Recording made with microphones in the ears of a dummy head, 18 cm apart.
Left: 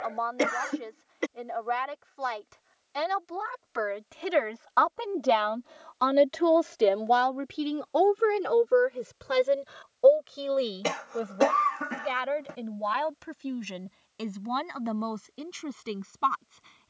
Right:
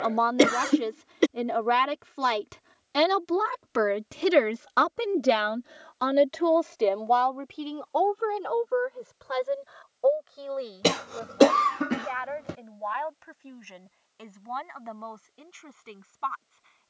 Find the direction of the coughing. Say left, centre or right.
right.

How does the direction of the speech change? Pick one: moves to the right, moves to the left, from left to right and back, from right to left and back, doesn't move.
moves to the left.